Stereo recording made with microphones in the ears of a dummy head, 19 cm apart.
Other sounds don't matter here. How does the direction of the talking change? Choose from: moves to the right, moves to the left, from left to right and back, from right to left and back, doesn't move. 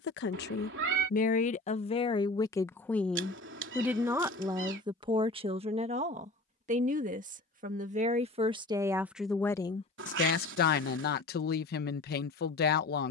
from left to right and back.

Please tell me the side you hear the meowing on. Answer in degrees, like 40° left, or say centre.
60° right.